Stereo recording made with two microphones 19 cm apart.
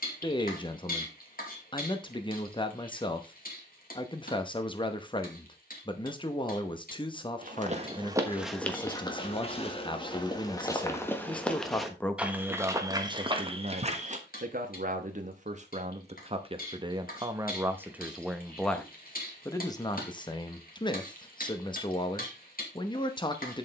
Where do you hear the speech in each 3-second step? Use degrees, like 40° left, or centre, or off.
30° left, 30° left, 30° left, 20° left, 30° right, 30° right, 10° left, 20° left.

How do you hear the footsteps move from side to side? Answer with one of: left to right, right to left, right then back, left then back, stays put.
left then back.